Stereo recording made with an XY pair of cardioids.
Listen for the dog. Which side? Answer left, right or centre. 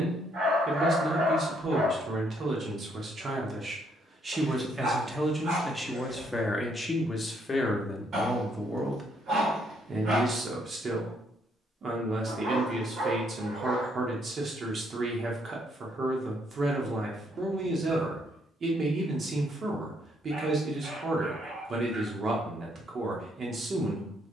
right.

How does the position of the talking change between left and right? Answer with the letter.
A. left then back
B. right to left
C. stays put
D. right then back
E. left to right
A.